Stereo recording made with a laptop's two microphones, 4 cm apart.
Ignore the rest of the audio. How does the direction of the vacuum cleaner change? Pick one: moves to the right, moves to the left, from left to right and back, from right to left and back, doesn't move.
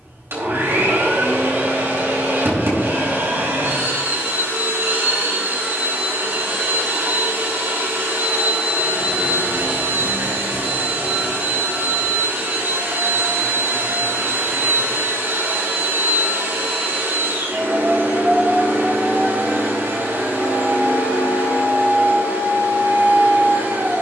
doesn't move.